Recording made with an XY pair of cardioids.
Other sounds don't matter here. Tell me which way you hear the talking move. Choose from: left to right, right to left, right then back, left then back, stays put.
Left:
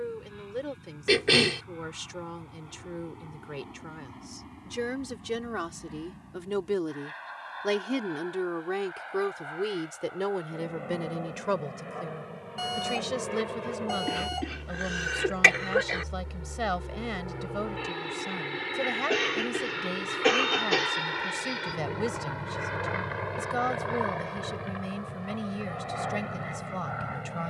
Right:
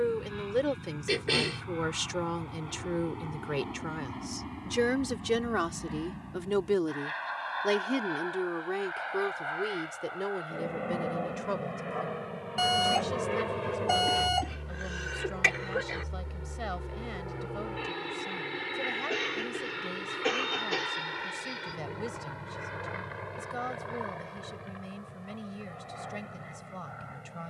right to left.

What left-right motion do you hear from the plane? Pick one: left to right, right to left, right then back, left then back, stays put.
right to left.